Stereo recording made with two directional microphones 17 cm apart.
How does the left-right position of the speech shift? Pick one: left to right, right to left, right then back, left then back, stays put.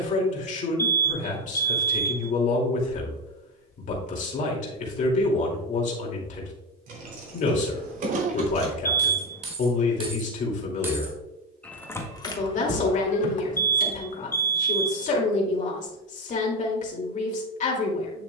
stays put.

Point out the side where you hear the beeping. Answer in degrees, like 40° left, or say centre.
10° left.